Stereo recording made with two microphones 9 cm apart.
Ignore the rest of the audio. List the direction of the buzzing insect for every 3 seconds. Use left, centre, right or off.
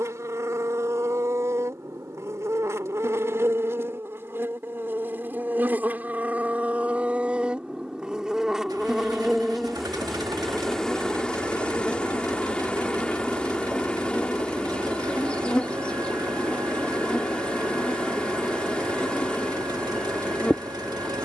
right, right, centre, centre, centre, centre, centre.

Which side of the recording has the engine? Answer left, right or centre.
right.